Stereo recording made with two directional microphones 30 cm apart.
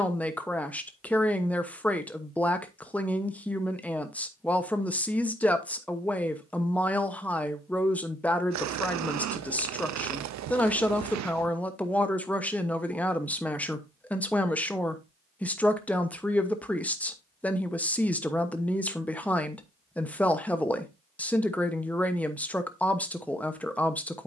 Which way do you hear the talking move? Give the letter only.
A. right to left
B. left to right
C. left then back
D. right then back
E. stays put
E.